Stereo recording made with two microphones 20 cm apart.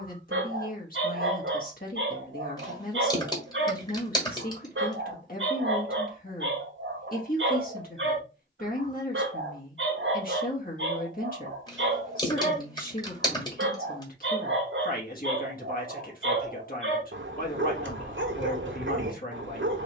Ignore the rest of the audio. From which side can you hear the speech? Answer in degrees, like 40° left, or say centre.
50° left.